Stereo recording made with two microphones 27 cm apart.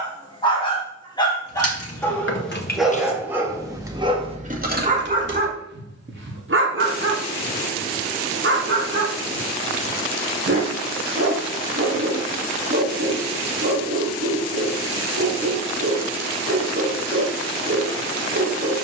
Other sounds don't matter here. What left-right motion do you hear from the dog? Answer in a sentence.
You can hear the dog travel towards the right.